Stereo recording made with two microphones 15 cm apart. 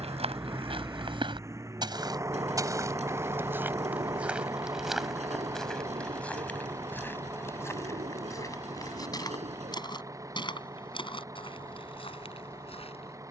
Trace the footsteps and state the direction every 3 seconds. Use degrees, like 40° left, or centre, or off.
30° right, 10° right, 20° left, 30° left, 40° left.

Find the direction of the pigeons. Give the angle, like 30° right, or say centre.
50° right.